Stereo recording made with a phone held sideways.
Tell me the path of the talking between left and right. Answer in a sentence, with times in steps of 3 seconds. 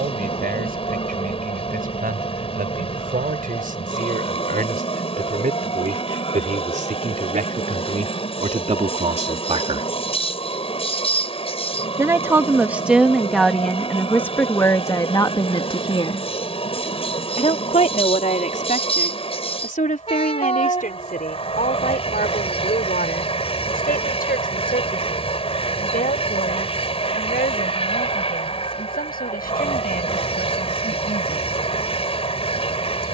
In this clip you hear the talking on the right from 0 s, in the centre from 12 s and on the left from 15 s.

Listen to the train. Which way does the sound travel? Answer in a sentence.
You can hear the train stay put.